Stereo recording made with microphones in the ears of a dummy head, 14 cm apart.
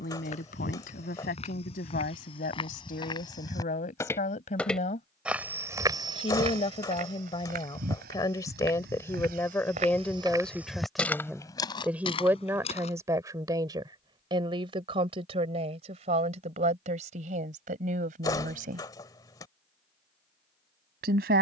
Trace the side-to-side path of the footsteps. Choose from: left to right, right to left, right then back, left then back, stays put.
right then back.